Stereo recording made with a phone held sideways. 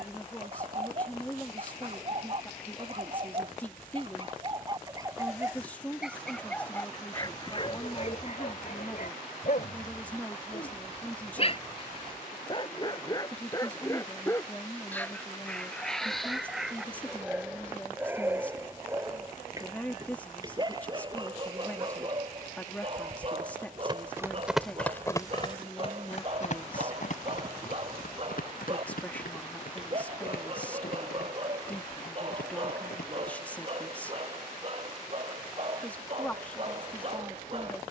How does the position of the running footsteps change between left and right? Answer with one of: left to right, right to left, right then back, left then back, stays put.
right to left.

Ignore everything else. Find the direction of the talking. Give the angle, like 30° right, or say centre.
10° left.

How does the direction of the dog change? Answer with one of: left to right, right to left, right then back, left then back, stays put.
left then back.